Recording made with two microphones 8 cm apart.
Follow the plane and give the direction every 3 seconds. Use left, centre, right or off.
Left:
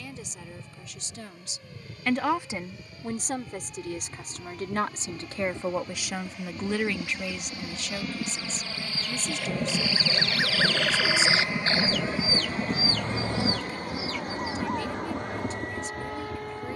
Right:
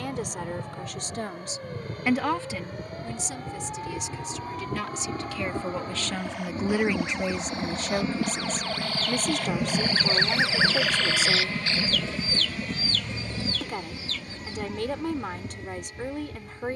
right, right, right, centre, left, left.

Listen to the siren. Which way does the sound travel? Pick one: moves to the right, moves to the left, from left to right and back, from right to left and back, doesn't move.
moves to the left.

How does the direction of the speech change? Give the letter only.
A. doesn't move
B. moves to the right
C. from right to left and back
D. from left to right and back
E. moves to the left
C.